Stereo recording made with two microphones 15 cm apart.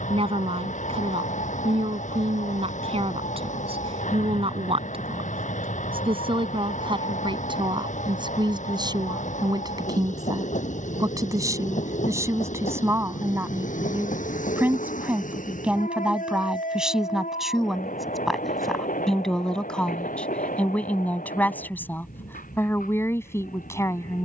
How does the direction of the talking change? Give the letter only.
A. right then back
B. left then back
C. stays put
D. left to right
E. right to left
E.